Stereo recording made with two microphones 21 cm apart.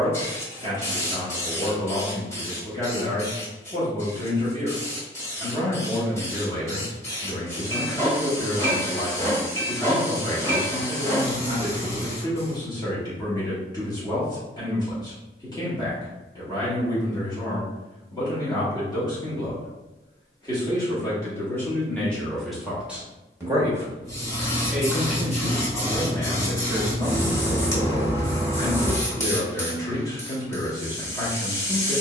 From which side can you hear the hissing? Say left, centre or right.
centre.